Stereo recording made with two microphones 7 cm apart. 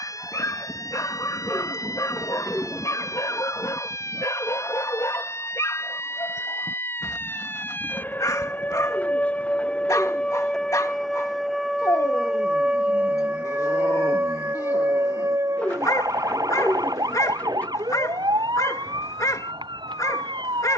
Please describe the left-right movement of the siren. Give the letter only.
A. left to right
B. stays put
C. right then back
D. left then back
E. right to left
A.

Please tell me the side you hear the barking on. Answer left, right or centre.
left.